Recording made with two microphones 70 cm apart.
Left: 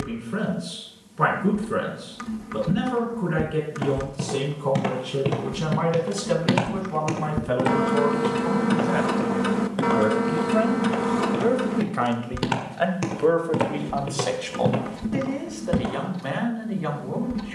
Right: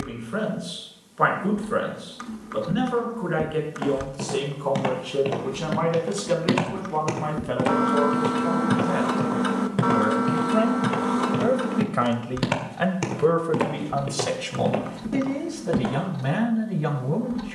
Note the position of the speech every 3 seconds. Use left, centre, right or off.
left, left, left, centre, right, right.